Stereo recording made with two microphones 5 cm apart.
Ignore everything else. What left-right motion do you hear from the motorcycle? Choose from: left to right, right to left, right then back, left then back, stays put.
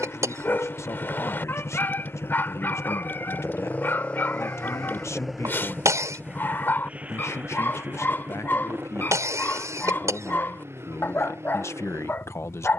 left to right.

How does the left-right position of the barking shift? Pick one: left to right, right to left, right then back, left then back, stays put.
stays put.